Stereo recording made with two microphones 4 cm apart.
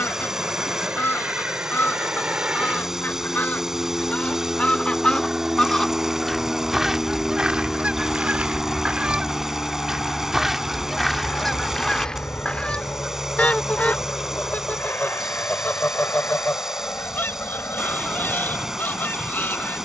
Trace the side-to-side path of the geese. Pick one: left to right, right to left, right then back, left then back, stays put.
right then back.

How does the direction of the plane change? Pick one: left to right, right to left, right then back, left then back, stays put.
right to left.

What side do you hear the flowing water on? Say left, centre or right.
centre.